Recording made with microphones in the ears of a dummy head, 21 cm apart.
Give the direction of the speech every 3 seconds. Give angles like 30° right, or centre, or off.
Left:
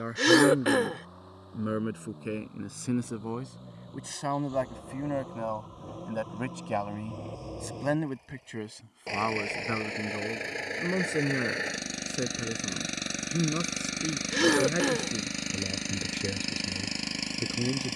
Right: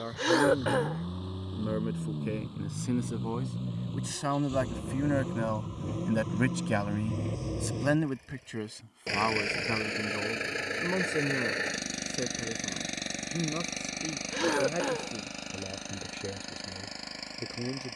10° left, 10° right, 20° right, 10° left, 20° left, 20° left.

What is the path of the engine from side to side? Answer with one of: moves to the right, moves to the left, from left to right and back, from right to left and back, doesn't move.
moves to the left.